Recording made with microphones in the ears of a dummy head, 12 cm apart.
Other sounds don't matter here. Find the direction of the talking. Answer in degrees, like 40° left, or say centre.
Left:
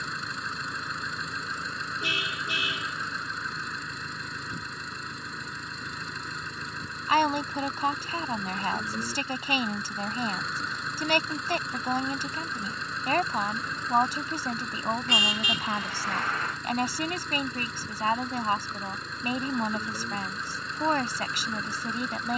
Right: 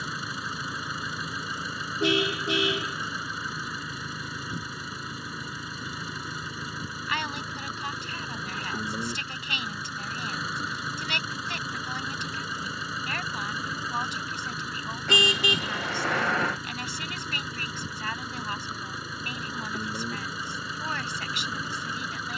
30° left.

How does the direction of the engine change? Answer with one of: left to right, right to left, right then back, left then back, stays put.
stays put.